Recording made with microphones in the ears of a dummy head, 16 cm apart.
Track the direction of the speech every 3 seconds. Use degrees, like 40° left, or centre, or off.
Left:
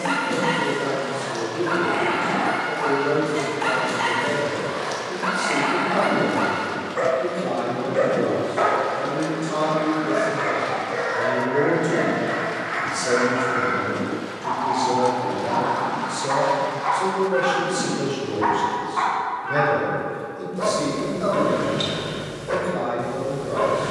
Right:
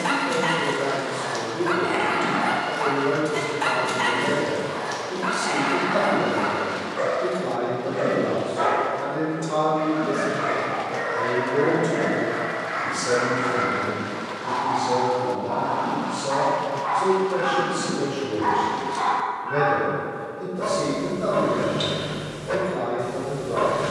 20° right, 20° right, 20° right, 10° right, 20° left, 40° left, 60° left, 60° left.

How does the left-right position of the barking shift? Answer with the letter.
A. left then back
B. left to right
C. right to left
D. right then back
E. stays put
A.